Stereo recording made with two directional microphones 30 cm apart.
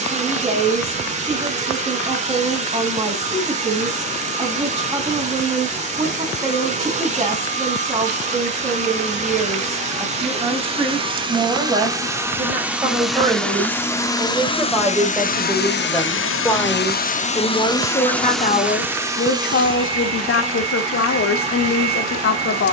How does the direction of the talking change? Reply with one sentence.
You can hear the talking travel towards the left.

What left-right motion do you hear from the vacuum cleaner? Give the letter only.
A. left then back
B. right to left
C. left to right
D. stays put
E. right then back
A.